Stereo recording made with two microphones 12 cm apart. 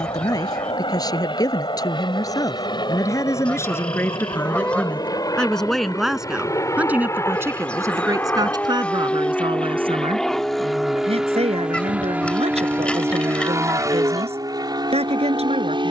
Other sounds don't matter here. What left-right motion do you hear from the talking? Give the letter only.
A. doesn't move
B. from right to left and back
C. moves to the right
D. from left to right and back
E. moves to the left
C.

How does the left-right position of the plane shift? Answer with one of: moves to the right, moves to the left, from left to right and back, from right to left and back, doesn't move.
moves to the right.